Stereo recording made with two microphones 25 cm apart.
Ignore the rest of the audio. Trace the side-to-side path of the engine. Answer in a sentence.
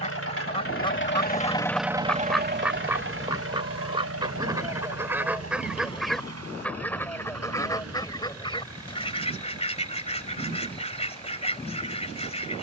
You can hear the engine move from left to right.